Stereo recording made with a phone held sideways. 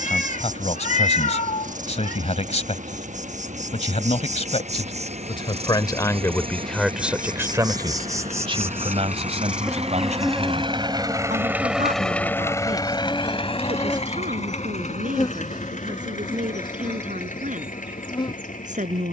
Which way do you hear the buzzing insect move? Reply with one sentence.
In this clip you hear the buzzing insect move from right to left.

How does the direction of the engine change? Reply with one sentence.
In this clip you hear the engine move to the left.